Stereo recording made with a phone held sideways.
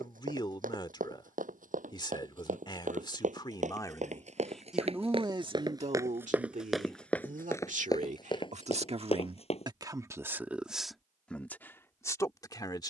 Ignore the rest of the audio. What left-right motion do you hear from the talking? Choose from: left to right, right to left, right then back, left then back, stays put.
right then back.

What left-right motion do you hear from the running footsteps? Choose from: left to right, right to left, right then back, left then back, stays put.
right to left.